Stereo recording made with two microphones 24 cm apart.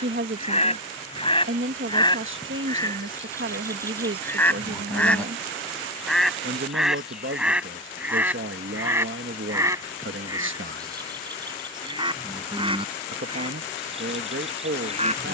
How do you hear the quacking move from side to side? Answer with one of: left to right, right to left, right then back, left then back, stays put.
left to right.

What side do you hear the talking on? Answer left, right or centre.
right.